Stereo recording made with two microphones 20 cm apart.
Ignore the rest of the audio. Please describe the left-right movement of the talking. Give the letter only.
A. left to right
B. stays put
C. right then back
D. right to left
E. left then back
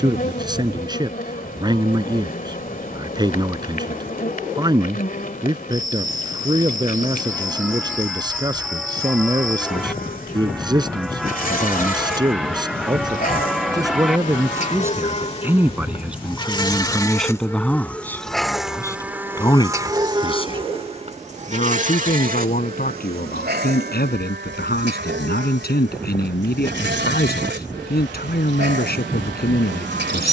D.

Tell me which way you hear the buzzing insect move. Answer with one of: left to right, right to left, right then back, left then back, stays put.
left to right.